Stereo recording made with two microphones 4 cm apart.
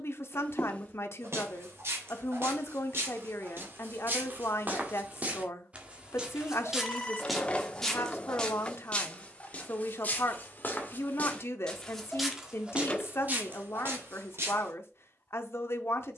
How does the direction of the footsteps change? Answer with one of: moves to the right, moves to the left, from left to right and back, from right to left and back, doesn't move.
from right to left and back.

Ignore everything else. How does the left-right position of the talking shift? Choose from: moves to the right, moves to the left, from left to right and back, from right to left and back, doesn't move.
doesn't move.